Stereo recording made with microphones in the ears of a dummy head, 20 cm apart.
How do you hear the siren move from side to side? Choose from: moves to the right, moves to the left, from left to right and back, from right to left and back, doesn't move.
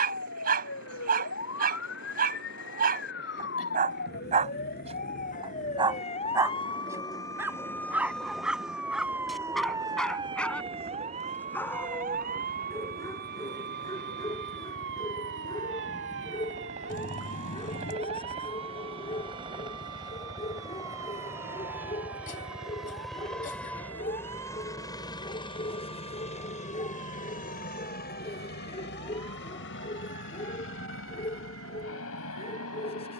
moves to the right.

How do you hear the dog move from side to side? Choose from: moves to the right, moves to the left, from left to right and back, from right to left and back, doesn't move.
moves to the left.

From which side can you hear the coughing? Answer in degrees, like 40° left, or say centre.
40° left.